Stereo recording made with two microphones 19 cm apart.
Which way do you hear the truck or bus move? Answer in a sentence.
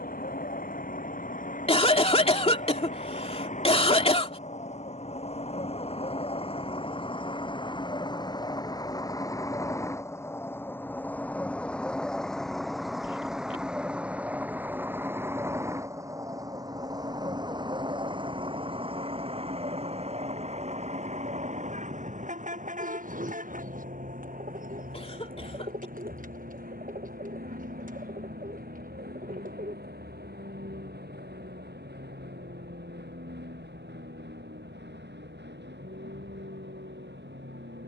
You can hear the truck or bus move from left to right.